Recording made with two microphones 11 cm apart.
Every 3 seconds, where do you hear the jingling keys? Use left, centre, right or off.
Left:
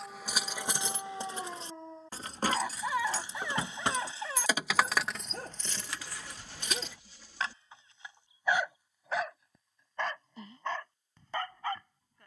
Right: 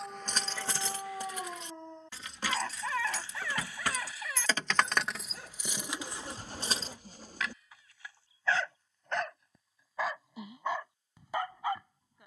left, centre, right, off.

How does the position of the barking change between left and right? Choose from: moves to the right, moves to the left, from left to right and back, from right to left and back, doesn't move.
from right to left and back.